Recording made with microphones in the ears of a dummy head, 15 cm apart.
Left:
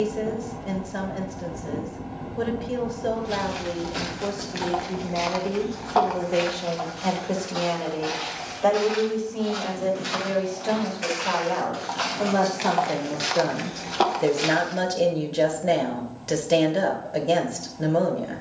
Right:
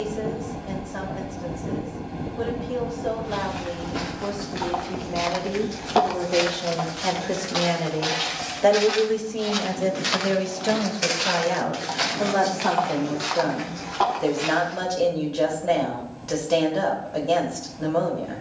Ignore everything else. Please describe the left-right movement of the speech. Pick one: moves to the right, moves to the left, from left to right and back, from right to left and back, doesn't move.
from left to right and back.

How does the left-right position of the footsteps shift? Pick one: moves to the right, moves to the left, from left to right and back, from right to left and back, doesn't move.
from left to right and back.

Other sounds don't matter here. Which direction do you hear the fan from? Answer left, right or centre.
right.